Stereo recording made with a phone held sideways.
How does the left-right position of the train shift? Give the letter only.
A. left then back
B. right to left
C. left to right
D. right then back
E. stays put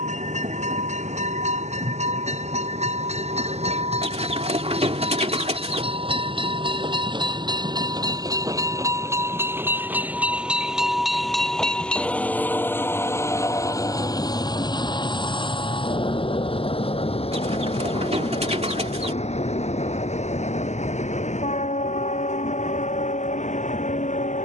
B.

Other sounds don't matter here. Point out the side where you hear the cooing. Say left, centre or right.
right.